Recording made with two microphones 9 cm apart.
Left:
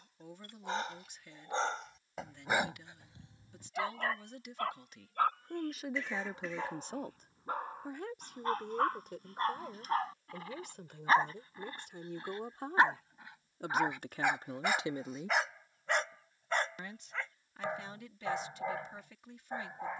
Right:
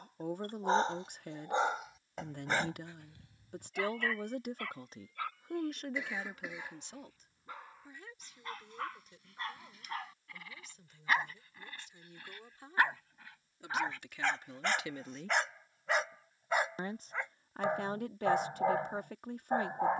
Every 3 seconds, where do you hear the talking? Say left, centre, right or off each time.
right, right, left, left, left, right, right.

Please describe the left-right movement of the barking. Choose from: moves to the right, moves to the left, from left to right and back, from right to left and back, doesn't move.
from right to left and back.